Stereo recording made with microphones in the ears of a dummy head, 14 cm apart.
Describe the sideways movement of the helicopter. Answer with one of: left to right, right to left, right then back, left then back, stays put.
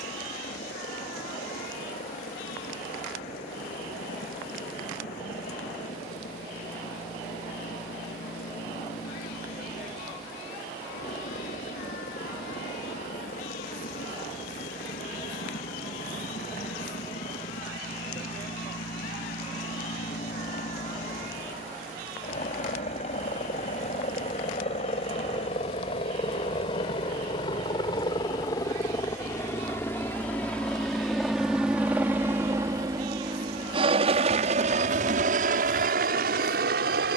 left to right.